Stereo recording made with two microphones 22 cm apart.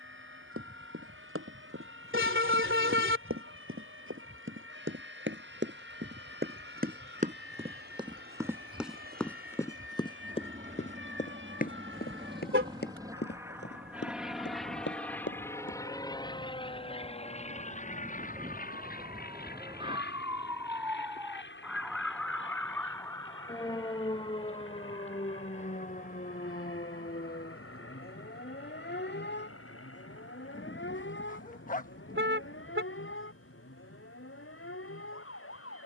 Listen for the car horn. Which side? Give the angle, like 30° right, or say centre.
70° right.